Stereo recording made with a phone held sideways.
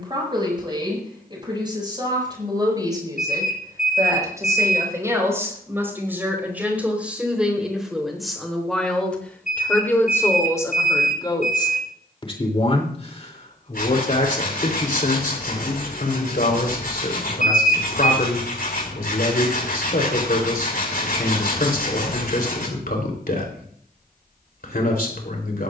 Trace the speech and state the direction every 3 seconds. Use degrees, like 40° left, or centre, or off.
30° right, 20° right, centre, 20° left, 50° left, 60° left, 60° left, 60° left, 60° left.